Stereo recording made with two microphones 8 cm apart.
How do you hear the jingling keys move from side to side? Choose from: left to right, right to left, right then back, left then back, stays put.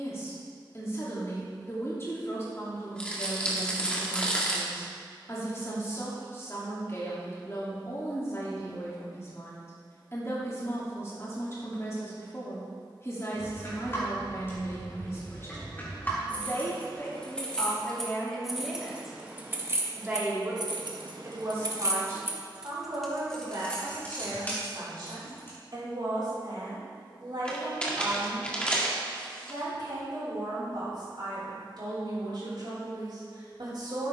right then back.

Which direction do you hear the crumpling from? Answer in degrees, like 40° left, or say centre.
10° left.